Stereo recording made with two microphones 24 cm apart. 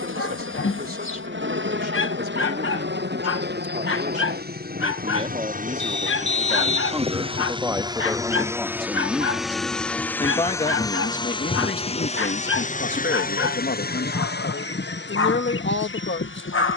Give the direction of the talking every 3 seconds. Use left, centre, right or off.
right, right, centre, left, left, left.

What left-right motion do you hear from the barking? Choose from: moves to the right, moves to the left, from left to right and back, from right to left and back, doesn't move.
doesn't move.